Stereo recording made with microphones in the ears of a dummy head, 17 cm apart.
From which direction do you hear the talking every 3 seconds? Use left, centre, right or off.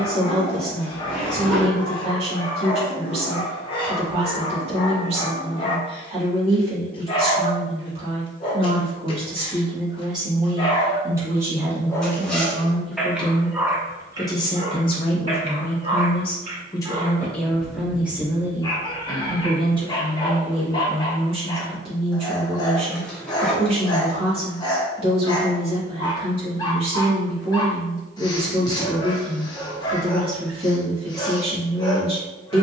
right, right, right, right, centre, left, right, right, right, right, right.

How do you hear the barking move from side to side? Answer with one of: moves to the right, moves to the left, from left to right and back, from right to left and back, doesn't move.
from left to right and back.